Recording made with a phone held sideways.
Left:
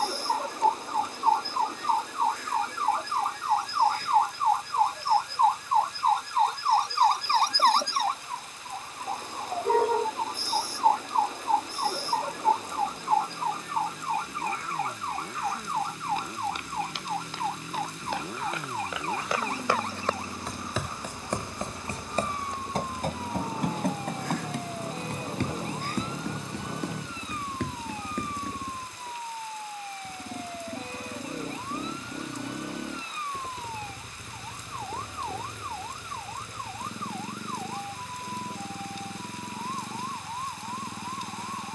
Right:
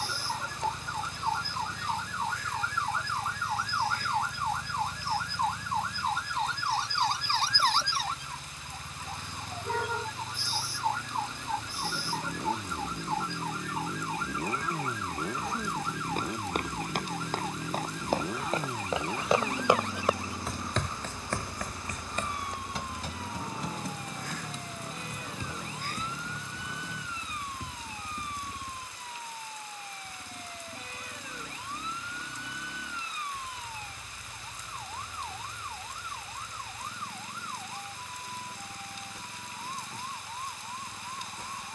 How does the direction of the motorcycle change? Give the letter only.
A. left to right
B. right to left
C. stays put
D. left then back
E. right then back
B.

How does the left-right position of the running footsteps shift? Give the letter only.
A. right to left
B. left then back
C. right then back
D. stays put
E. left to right
A.